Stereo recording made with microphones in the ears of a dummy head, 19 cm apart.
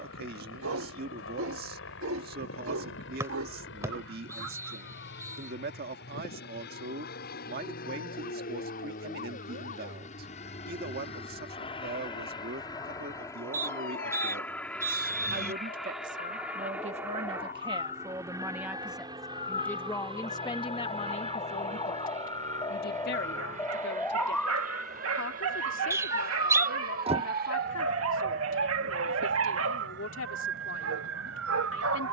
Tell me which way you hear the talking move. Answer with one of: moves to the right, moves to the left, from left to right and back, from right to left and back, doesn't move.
moves to the left.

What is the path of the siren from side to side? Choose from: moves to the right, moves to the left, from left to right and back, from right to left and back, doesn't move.
moves to the right.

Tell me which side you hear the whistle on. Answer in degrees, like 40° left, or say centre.
10° right.